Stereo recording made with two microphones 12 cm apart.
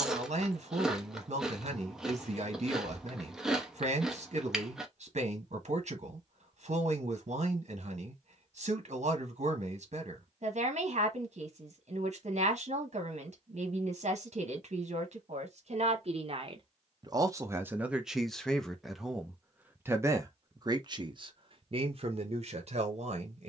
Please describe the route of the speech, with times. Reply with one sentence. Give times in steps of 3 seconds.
You can hear the speech on the right from 0 s, in the centre from 18 s and on the right from 21 s.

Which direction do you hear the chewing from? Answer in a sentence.
In this clip you hear the chewing in the centre.